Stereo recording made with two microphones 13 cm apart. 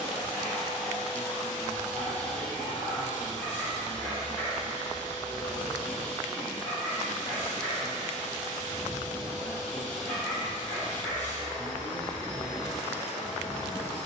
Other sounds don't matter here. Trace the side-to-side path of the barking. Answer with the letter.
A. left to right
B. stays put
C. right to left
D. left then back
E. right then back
B.